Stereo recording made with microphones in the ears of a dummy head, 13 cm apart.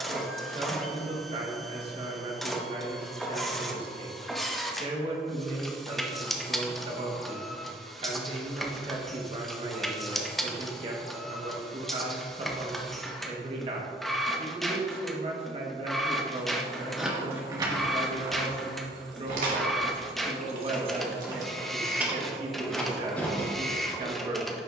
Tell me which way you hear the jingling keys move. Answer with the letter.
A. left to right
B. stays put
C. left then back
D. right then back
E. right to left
D.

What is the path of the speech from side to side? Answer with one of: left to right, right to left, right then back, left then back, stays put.
stays put.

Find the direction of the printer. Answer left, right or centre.
centre.